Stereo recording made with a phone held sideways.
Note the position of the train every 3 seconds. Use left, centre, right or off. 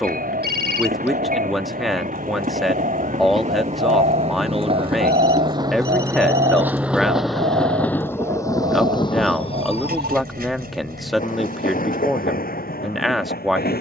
right, right, centre, left, left.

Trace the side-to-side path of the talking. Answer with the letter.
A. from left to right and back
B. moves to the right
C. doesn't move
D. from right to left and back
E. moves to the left
C.